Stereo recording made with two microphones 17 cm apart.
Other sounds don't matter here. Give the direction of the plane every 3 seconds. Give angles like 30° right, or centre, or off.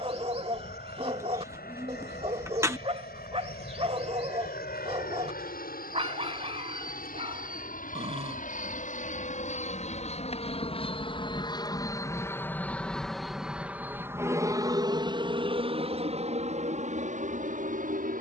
80° left, 70° left, 60° left, 40° left, centre, 40° right.